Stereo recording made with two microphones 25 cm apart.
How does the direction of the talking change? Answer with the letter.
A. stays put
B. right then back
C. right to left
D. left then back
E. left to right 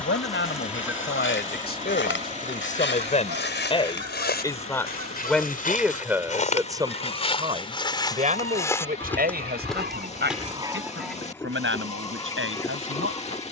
E.